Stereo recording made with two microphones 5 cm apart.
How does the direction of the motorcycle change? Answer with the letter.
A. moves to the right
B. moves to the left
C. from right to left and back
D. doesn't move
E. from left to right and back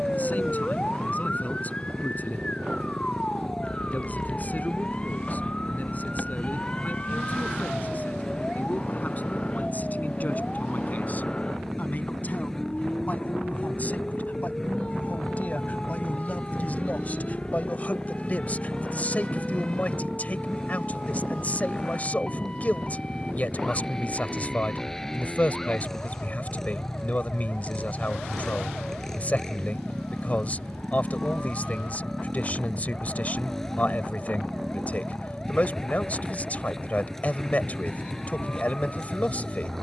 D.